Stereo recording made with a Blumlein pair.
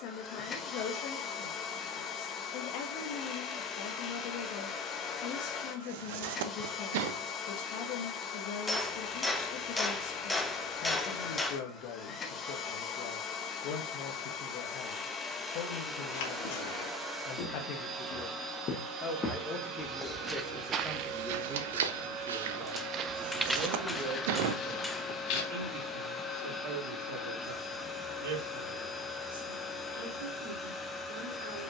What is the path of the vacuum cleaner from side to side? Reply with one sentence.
In this clip you hear the vacuum cleaner go right and come back.